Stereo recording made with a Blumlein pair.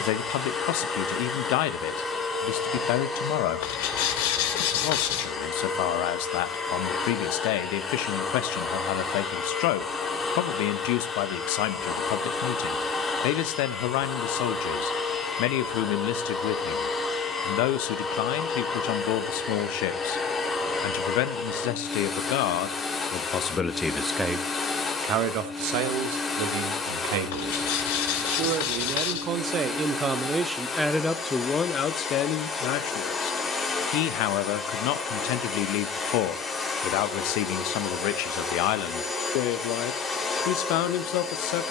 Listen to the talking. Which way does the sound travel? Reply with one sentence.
You can hear the talking move from left to right and back again.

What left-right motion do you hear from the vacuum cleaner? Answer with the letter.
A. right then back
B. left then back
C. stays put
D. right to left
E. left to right
C.